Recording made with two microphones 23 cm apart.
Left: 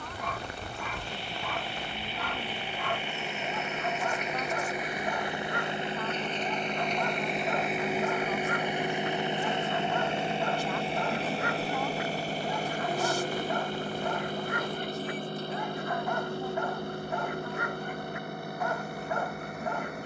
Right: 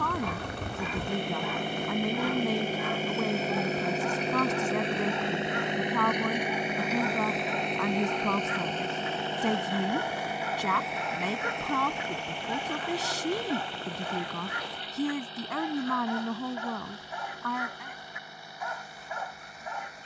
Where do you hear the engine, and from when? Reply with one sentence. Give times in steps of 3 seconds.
You can hear the engine on the right from 0 s, in the centre from 6 s and on the left from 9 s.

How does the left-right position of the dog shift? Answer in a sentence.
In this clip you hear the dog stay in one place.